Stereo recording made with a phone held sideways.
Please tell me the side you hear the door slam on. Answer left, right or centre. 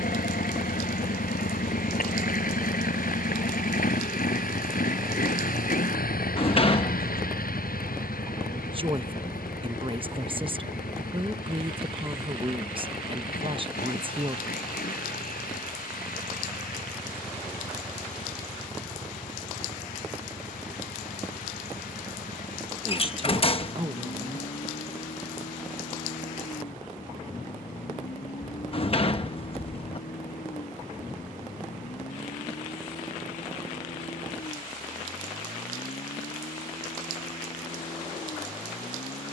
left.